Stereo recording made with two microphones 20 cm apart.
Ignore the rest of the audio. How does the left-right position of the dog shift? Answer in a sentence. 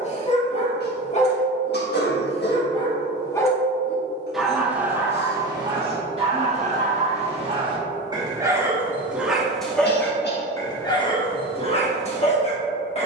In this clip you hear the dog move from left to right and back again.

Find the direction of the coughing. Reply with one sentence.
You can hear the coughing on the left.